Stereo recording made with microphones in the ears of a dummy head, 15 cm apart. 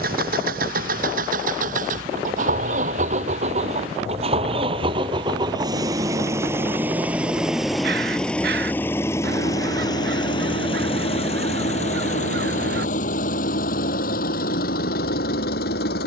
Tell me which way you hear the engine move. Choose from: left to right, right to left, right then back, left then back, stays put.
right to left.